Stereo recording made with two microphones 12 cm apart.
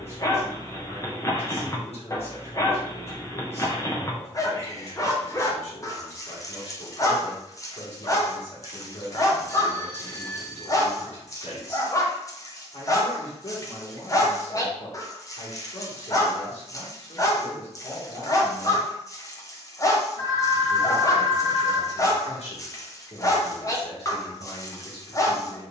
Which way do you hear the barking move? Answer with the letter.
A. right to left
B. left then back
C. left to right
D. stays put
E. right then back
D.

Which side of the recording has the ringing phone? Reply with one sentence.
In this clip you hear the ringing phone on the left.